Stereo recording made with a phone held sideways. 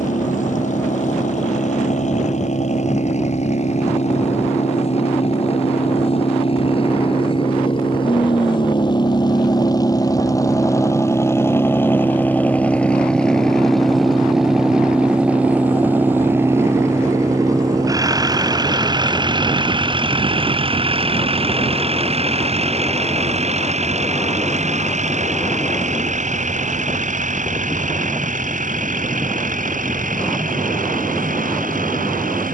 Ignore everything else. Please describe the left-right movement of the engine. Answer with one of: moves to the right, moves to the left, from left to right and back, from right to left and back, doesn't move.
moves to the right.